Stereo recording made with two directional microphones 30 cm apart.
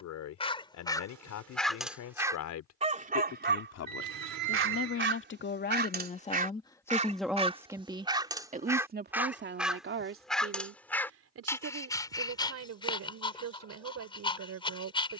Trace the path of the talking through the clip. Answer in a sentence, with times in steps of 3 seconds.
In this clip you hear the talking on the left from 0 s, in the centre from 6 s and on the right from 9 s.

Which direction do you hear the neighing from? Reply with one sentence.
You can hear the neighing on the right.